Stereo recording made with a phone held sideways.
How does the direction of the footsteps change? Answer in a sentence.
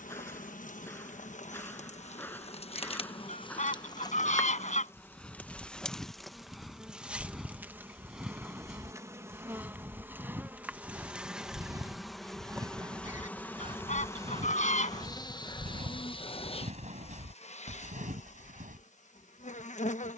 In this clip you hear the footsteps move from left to right.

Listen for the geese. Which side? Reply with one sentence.
You can hear the geese on the left.